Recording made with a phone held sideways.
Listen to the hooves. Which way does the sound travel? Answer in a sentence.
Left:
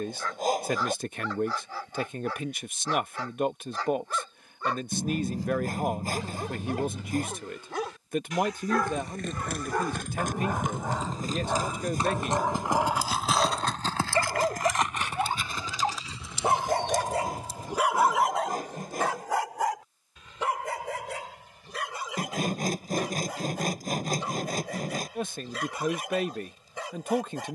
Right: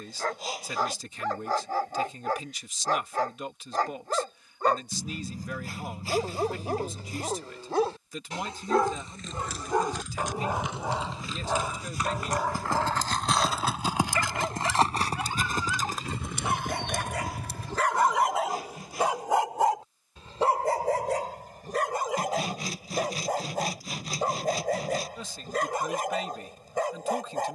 In this clip you hear the hooves move to the right.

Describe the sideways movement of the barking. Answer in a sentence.
You can hear the barking go left and come back.